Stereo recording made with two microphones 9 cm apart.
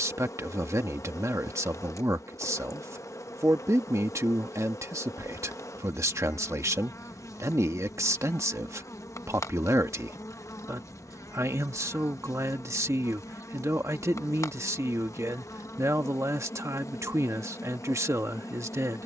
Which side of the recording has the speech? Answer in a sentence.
In this clip you hear the speech on the right.